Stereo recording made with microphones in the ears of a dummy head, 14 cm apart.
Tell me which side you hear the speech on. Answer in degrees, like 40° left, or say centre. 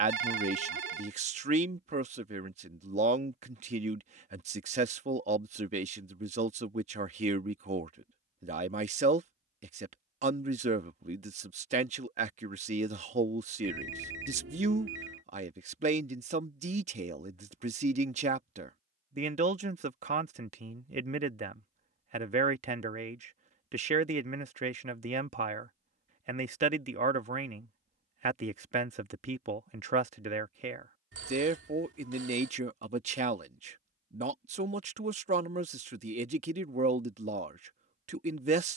40° right.